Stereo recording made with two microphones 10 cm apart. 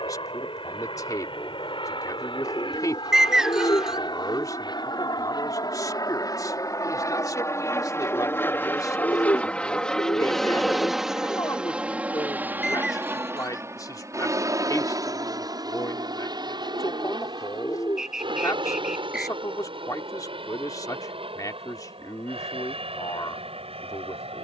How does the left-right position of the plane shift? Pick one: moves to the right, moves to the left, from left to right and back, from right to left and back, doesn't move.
moves to the right.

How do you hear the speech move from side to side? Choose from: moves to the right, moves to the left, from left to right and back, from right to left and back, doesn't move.
doesn't move.